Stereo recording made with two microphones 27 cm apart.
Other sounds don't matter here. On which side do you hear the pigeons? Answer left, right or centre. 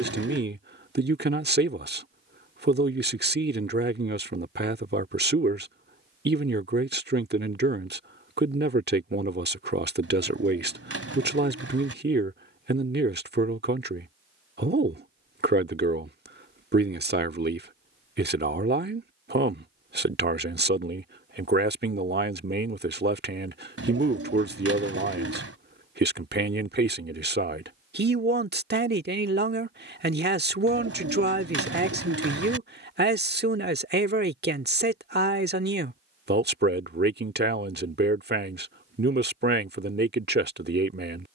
right.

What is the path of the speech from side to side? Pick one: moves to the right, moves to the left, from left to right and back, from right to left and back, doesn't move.
doesn't move.